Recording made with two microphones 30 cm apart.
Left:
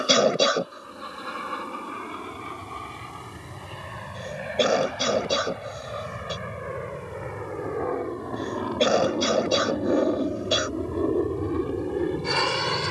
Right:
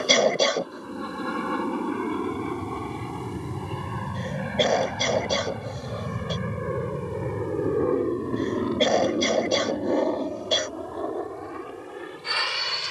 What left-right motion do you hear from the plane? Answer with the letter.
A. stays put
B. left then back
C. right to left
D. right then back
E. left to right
C.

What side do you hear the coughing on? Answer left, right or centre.
centre.